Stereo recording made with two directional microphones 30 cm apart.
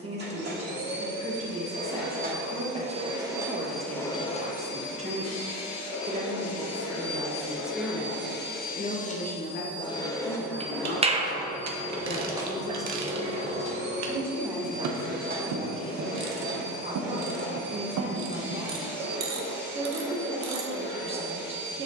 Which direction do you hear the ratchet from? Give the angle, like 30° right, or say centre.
60° right.